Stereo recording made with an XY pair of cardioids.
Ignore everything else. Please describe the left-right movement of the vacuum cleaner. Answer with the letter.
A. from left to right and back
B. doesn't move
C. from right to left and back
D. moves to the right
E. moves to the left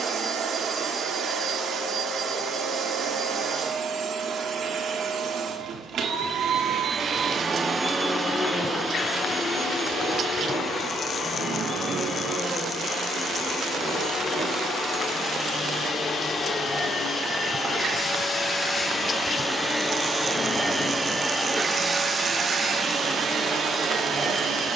C.